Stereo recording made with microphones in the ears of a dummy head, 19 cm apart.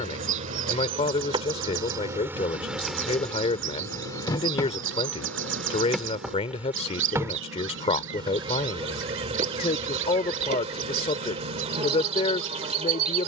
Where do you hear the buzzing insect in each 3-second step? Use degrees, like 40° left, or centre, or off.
20° right, 10° left, 20° right, 30° right, 30° right.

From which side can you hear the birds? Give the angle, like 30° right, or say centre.
60° right.